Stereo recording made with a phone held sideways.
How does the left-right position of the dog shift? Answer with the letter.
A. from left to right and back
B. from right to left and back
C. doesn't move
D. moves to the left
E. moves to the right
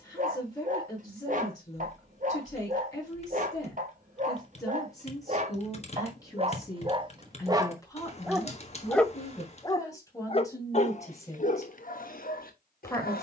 D.